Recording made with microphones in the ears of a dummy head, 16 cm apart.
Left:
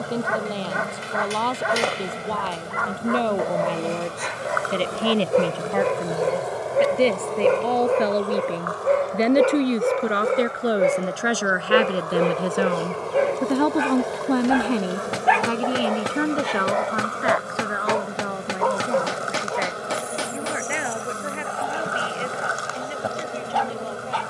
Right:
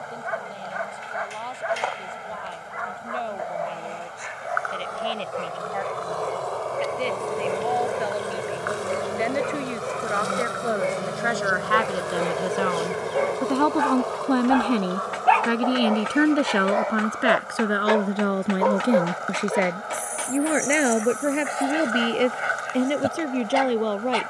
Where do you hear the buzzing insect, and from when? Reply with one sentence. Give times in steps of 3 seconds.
In this clip you hear the buzzing insect on the left from 0 s, in the centre from 6 s, on the right from 9 s, in the centre from 12 s and on the left from 15 s.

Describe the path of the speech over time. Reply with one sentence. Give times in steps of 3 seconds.
In this clip you hear the speech on the left from 0 s, in the centre from 12 s and on the right from 15 s.